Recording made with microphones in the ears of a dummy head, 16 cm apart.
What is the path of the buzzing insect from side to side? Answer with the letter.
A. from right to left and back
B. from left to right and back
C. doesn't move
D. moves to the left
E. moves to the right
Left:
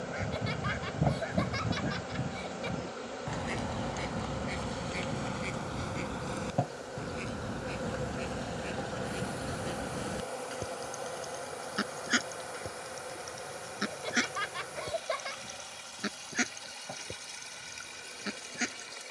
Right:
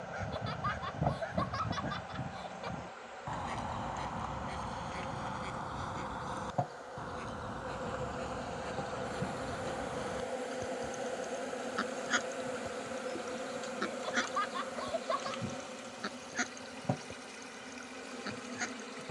E.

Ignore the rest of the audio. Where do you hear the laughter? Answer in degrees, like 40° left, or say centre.
30° left.